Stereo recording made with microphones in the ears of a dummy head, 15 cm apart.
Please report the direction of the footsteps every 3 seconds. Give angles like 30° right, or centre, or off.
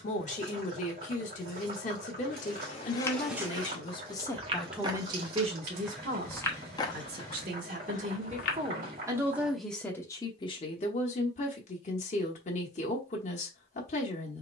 40° left, 20° right, 30° left, off, off.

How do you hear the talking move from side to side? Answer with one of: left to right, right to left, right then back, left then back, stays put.
right then back.